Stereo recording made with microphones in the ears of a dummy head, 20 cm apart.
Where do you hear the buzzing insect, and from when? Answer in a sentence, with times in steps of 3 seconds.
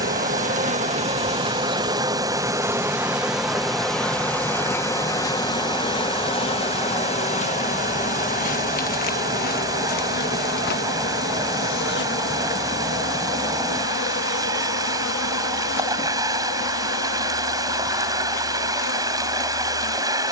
In this clip you hear the buzzing insect on the right from 0 s, in the centre from 3 s and on the left from 6 s.